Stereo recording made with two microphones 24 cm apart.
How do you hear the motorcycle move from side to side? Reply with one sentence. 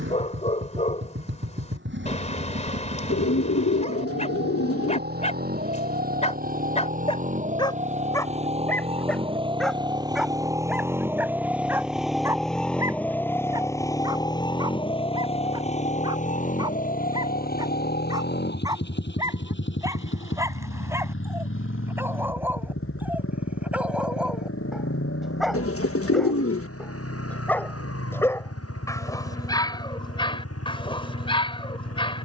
You can hear the motorcycle move from right to left.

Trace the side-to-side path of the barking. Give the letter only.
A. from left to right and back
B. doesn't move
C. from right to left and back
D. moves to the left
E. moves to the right
A.